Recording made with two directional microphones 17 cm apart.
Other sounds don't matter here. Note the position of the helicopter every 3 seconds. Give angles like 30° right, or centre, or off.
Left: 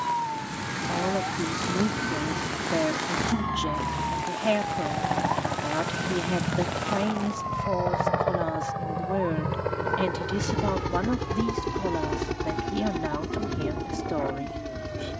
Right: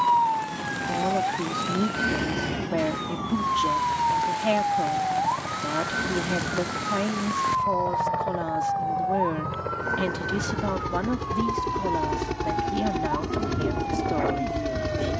50° left, 40° left, 30° left, 10° left, 20° right.